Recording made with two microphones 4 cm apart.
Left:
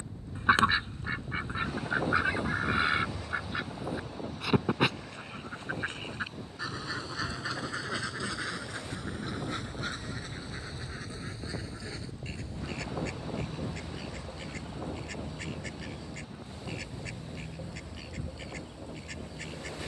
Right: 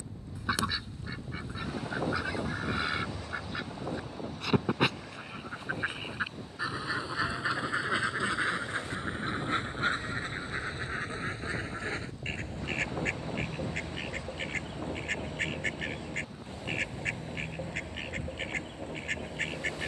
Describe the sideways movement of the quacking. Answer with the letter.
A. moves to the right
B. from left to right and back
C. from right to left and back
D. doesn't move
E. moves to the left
A.